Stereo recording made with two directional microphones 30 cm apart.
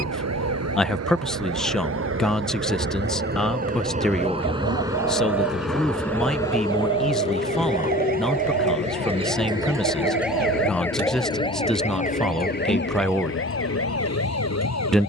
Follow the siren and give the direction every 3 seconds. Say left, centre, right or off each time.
right, right, right, centre, left.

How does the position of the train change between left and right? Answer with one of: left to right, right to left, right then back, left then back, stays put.
right to left.